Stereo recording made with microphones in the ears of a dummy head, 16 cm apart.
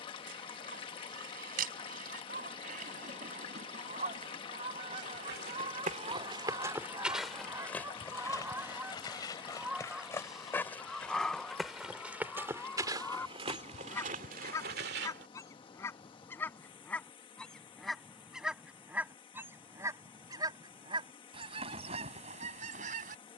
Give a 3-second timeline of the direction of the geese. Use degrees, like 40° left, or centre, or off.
50° right, 40° right, 20° right, centre, 10° left, 10° left, 10° right, 40° right.